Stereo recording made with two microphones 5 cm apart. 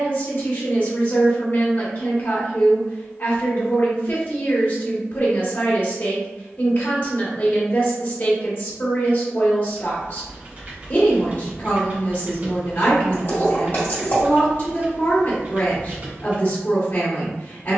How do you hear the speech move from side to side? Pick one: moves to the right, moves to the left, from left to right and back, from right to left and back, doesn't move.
doesn't move.